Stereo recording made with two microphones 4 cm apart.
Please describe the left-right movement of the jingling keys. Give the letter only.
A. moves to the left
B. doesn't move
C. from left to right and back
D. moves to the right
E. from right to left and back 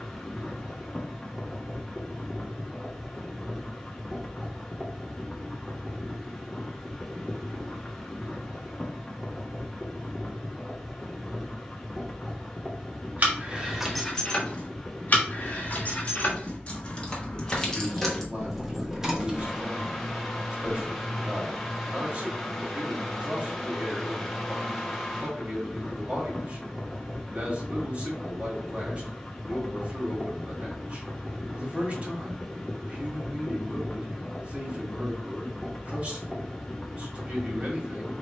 E.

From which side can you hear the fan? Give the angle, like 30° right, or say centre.
centre.